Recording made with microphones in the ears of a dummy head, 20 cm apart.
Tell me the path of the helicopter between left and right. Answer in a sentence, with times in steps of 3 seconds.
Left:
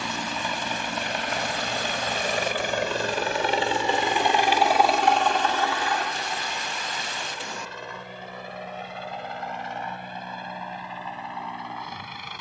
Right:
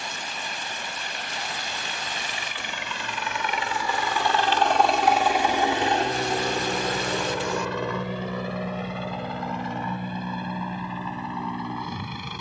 In this clip you hear the helicopter on the left from 0 s, in the centre from 3 s and on the right from 6 s.